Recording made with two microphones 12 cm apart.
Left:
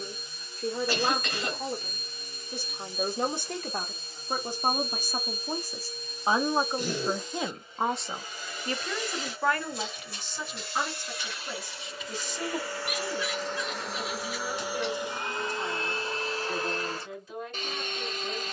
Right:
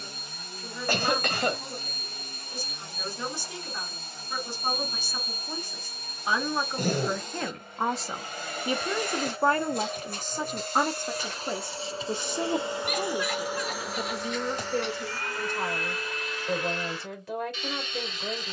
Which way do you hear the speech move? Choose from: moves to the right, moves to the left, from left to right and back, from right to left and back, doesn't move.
moves to the right.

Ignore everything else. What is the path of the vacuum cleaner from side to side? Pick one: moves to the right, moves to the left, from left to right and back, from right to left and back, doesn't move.
moves to the left.